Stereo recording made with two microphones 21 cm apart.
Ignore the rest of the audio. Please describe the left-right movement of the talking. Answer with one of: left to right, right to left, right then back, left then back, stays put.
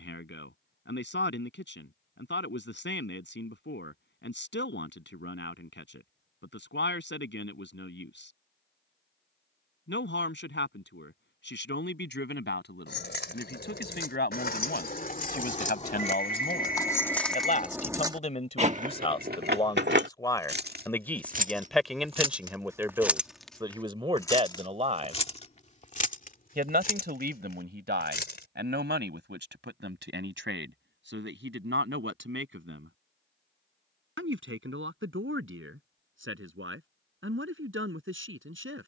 left to right.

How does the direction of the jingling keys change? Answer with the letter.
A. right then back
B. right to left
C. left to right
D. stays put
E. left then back
A.